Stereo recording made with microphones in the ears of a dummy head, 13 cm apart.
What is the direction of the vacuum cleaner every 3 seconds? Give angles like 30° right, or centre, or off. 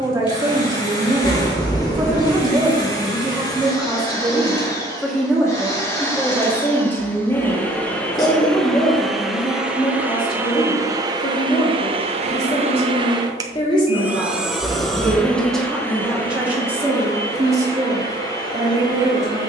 40° left, 30° left, 10° left, 20° right, 20° right, 20° left, 30° left.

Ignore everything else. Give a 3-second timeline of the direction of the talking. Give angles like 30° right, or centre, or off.
20° right, centre, 20° left, 40° left, 40° left, 10° right, 20° right.